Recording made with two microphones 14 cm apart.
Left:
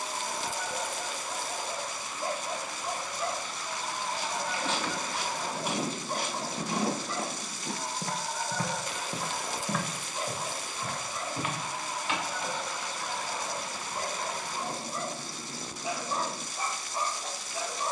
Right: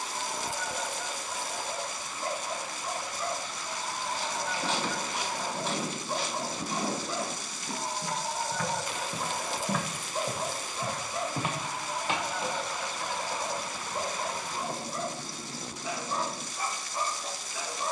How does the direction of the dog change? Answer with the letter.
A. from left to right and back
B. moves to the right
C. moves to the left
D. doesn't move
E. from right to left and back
A.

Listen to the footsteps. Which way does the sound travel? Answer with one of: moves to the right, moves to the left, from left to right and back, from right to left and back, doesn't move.
from right to left and back.